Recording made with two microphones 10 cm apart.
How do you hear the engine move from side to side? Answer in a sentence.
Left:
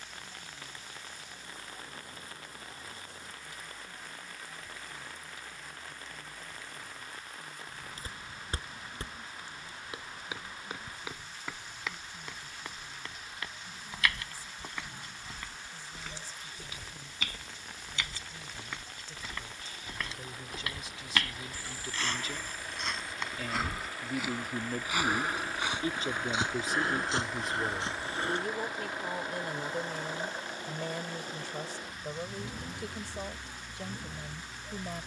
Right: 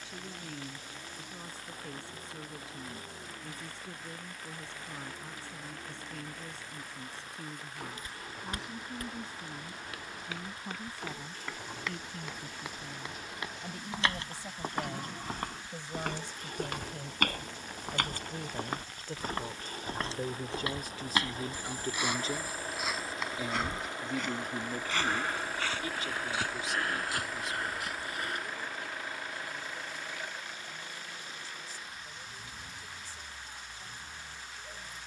In this clip you hear the engine go from the right side to the left.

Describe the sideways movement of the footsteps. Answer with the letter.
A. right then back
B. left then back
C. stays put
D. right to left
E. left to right
A.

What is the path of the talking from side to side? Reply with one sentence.
You can hear the talking move from right to left.